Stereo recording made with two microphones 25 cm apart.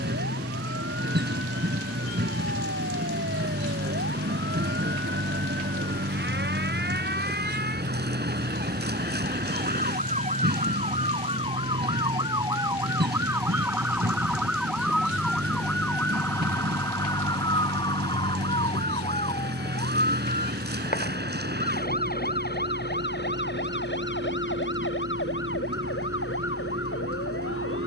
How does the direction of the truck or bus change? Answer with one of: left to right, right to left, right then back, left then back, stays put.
stays put.